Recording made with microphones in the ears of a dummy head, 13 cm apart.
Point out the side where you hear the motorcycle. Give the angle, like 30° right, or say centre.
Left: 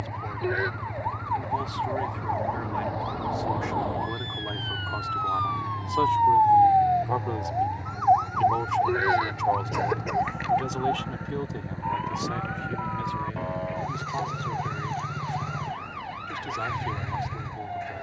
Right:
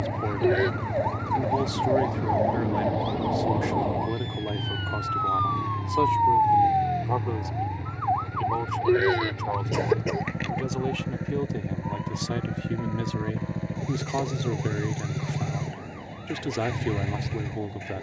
30° right.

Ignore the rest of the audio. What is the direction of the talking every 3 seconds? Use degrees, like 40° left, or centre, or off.
50° right, 30° right, centre, 10° right, 50° right, 60° right.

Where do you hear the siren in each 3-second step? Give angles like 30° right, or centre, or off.
50° right, 10° right, 40° left, 60° left, 70° left, 80° left.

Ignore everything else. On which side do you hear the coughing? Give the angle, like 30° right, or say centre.
30° right.